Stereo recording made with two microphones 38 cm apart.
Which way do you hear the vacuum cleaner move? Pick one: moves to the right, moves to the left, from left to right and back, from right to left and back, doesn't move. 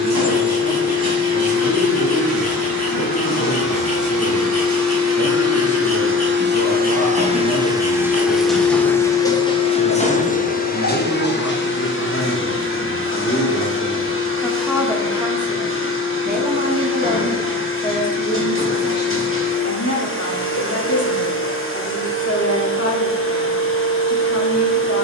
moves to the left.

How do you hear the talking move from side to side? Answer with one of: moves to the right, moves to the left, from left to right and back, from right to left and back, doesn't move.
from left to right and back.